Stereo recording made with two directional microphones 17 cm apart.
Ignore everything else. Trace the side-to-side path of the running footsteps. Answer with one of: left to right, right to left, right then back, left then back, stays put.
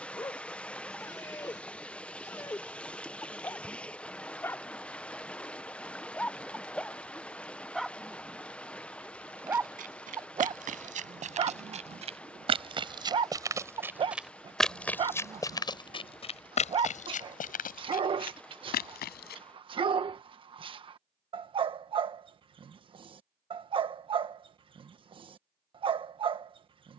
right to left.